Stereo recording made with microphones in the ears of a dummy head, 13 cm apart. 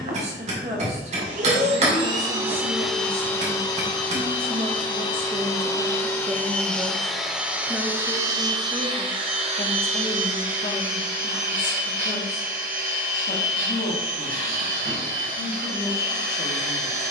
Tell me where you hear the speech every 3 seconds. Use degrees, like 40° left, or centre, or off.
50° right, 40° right, centre, 50° left, 70° left, 80° left.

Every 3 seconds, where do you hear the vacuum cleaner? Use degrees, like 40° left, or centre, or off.
40° right, 30° left, 10° right, 60° right, 70° right, 70° right.